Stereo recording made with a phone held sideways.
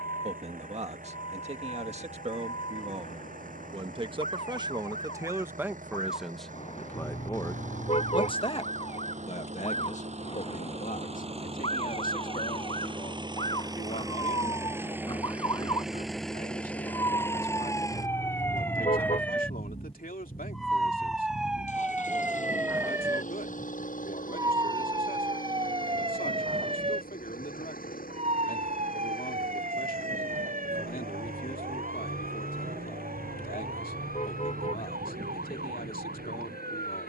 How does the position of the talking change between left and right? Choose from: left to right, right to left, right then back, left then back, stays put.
right to left.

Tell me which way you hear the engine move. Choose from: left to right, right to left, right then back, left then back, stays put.
right to left.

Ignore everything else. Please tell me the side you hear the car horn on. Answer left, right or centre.
left.